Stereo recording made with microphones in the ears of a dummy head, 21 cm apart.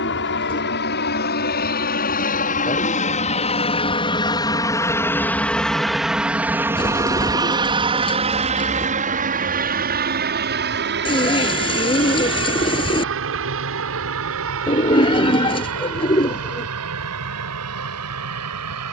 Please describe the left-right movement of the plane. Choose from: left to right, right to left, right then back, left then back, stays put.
left to right.